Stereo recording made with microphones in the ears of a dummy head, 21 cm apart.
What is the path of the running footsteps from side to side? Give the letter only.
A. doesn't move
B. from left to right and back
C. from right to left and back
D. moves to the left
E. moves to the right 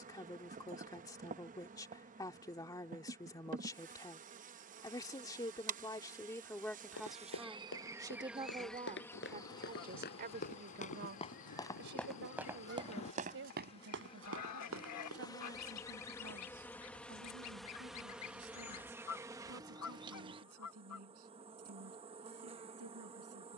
E.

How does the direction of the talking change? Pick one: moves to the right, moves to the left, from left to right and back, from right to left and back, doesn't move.
moves to the right.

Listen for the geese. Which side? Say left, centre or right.
left.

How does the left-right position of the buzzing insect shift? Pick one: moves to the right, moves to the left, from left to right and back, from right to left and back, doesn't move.
from right to left and back.